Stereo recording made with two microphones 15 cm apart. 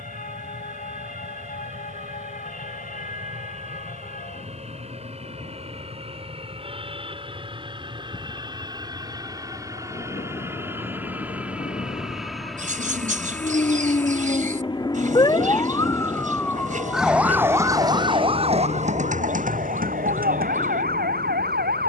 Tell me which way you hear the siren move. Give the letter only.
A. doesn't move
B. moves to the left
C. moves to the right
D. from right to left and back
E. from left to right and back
C.